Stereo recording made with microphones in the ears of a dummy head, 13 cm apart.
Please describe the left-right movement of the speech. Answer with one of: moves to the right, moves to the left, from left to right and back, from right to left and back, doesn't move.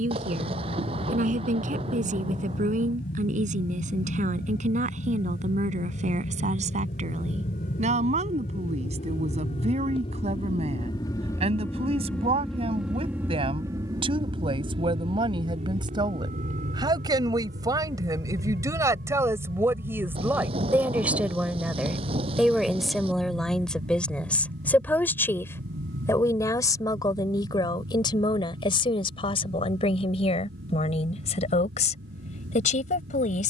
moves to the left.